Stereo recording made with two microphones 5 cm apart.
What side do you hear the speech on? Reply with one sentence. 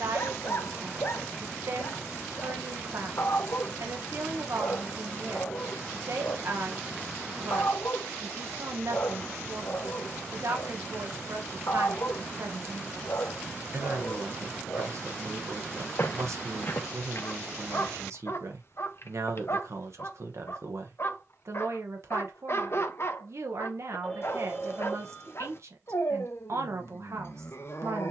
In this clip you hear the speech on the right.